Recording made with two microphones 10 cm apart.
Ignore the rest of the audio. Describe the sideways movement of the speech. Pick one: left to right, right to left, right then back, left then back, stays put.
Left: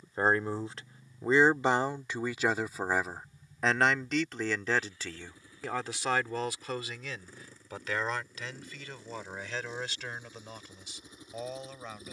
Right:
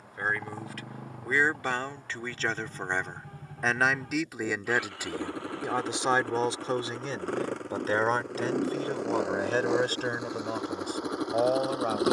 left to right.